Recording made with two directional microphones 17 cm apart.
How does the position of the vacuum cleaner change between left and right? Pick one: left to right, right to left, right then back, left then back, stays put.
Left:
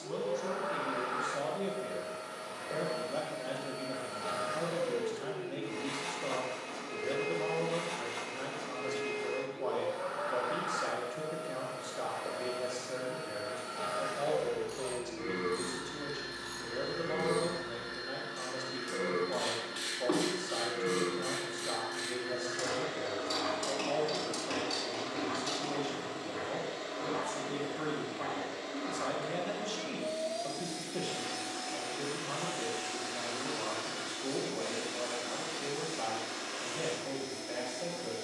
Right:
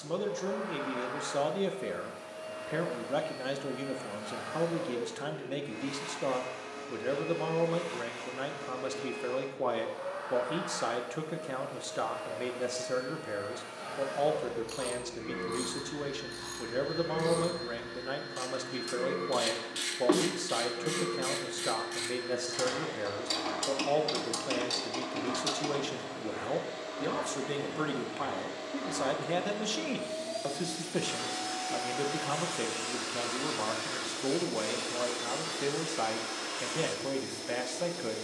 left to right.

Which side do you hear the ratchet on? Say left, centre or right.
right.